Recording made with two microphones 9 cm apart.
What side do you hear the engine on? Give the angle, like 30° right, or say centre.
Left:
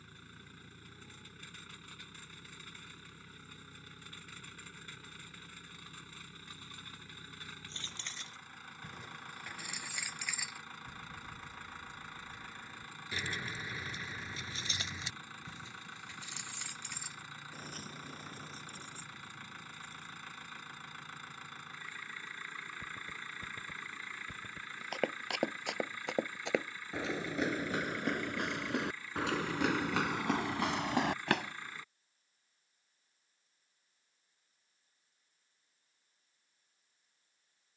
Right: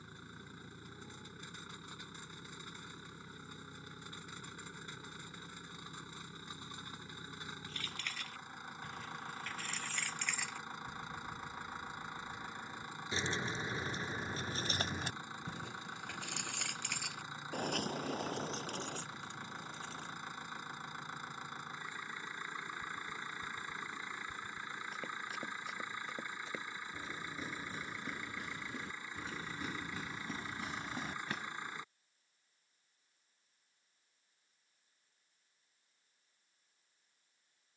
20° right.